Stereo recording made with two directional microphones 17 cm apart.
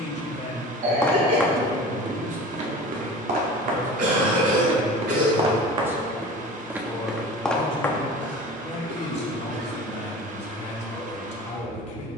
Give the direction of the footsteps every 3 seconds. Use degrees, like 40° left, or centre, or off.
20° right, 40° right, centre, off.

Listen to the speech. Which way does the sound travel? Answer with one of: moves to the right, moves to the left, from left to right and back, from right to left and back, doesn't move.
from left to right and back.